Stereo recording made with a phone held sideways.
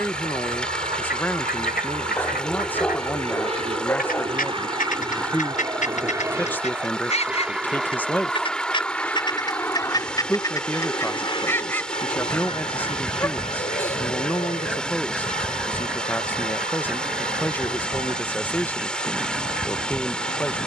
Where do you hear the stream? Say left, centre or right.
centre.